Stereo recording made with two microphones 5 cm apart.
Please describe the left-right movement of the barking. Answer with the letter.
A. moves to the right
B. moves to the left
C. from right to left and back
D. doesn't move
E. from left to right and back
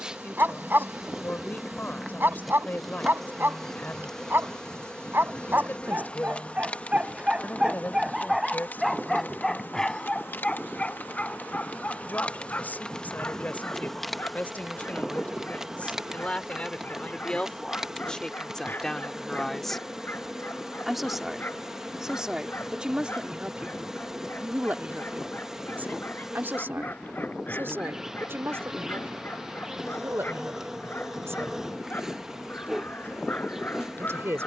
B.